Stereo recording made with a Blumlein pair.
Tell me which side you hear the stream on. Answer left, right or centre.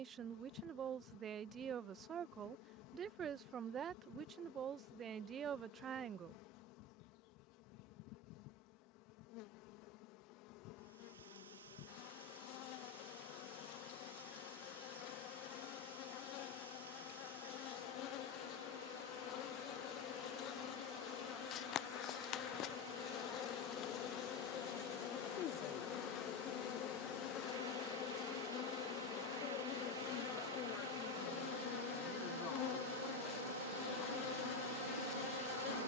right.